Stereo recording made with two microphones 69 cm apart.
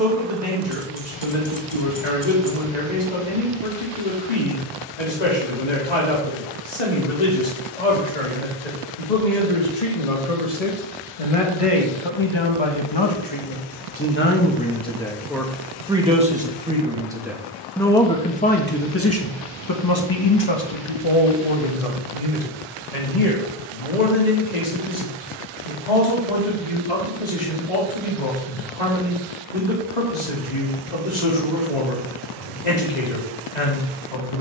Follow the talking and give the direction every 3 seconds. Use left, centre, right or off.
left, left, left, left, left, centre, left, left, left, left, left, left.